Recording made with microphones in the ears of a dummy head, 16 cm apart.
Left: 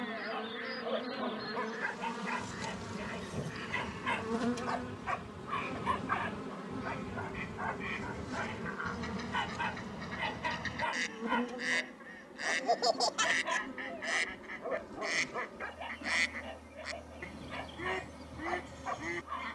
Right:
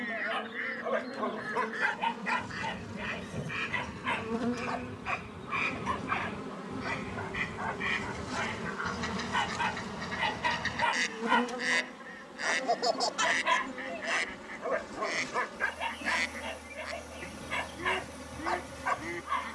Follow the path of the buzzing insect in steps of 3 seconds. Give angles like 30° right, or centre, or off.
40° left, 20° left, 20° right, 40° right, 60° right, 60° right, 60° right.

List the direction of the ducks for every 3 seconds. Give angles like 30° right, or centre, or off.
70° right, 60° right, 50° right, 20° right, centre, 10° left, 10° left.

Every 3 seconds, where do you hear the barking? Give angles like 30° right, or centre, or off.
40° right, centre, centre, 30° right, 50° right, 50° right, 50° right.